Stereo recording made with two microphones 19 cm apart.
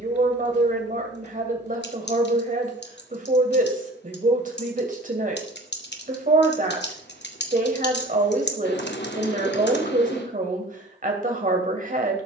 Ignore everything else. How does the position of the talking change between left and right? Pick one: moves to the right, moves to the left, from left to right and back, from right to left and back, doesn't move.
doesn't move.